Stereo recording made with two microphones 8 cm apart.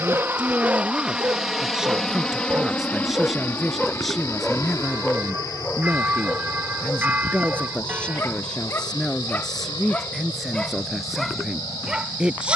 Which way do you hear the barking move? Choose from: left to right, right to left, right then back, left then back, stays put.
left then back.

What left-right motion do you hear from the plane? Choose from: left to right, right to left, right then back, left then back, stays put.
right to left.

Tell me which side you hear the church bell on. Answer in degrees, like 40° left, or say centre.
20° right.